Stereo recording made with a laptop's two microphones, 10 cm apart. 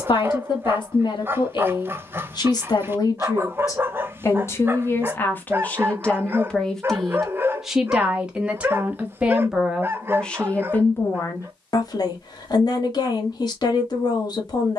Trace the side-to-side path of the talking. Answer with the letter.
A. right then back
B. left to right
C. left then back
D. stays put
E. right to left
A.